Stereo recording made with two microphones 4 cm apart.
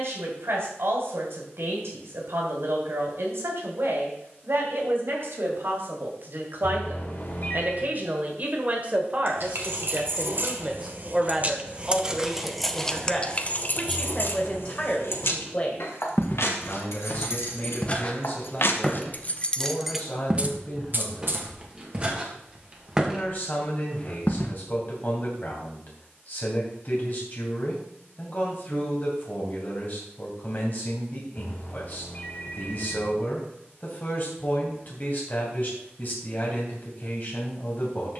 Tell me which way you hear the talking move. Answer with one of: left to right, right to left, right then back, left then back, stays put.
right to left.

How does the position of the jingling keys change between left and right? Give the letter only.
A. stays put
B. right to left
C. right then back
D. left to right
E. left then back
E.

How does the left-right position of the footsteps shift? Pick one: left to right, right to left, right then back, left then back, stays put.
right then back.